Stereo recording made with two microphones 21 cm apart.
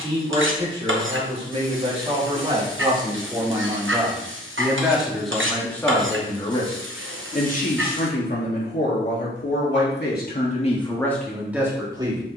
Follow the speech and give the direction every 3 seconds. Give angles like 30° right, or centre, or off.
30° right, 10° right, 40° left, 30° left.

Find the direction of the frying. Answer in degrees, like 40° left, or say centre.
70° right.